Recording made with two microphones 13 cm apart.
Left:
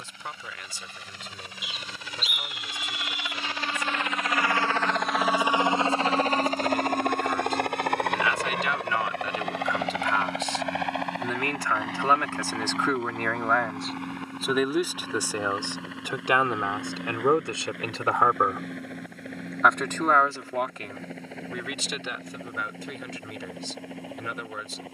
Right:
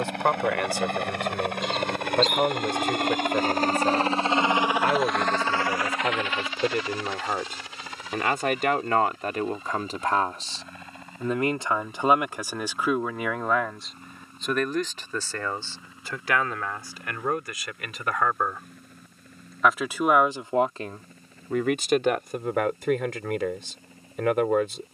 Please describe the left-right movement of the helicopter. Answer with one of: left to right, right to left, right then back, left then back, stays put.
right to left.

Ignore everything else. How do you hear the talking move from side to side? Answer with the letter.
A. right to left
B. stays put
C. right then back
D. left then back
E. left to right
D.